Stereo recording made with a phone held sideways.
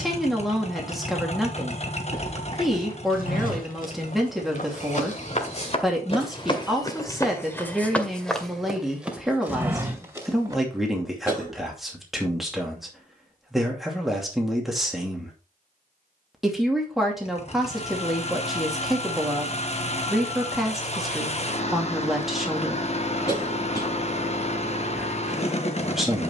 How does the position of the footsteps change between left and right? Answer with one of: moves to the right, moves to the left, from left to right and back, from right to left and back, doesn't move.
moves to the right.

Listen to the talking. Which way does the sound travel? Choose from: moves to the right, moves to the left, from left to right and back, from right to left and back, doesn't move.
doesn't move.